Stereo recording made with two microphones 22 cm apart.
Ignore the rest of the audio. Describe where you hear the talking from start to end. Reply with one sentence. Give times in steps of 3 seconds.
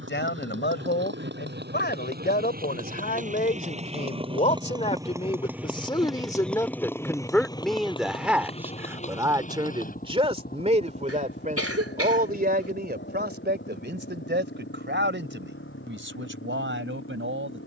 You can hear the talking on the left from 0 s, in the centre from 6 s and on the right from 9 s.